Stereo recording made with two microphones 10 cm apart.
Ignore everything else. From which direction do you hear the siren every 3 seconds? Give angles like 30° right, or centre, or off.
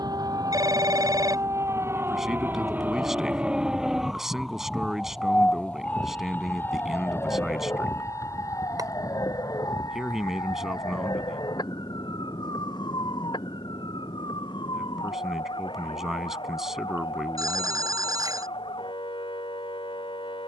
30° right, centre, 30° left, 40° left, 50° left, 60° left, 60° left.